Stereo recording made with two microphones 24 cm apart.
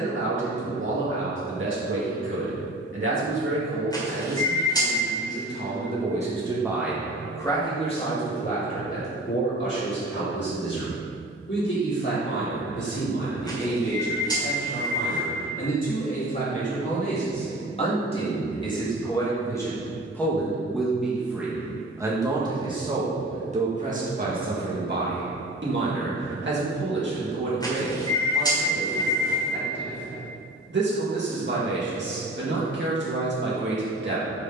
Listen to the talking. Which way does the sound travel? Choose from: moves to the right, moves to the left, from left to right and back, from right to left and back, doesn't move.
from right to left and back.